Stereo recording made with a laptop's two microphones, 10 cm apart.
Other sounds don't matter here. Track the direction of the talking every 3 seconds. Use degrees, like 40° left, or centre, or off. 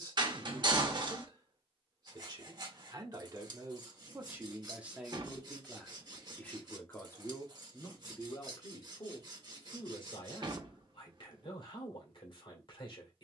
40° right, 20° right, 30° left, 50° left, 50° left.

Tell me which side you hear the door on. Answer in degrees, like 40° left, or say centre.
50° right.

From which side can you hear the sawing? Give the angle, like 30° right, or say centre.
40° right.